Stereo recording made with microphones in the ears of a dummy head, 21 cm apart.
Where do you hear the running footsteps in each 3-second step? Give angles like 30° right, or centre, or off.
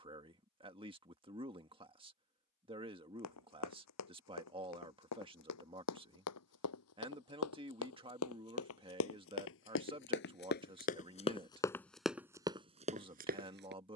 off, 80° left, 70° left, 40° left, 30° right.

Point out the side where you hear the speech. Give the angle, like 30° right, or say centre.
20° right.